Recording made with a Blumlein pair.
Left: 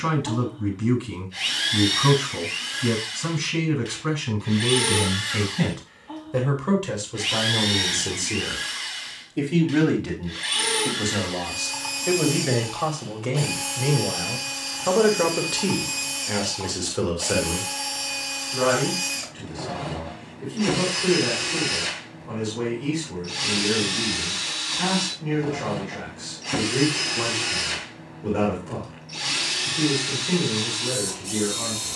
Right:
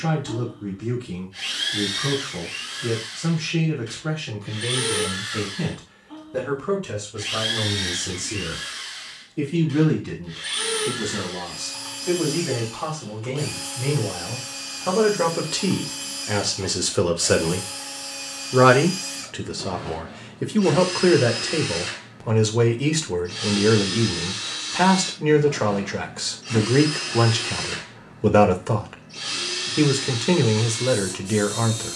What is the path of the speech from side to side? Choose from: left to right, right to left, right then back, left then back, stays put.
left to right.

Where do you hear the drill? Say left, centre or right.
left.